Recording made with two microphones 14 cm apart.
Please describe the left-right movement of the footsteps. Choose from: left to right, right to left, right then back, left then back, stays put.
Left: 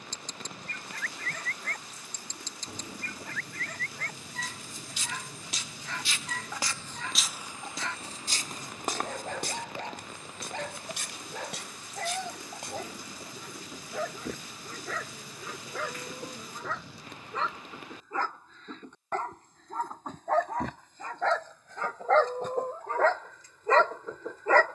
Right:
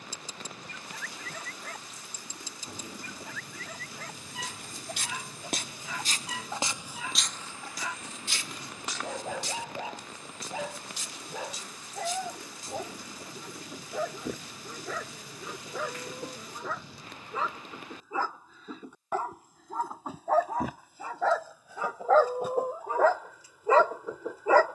right to left.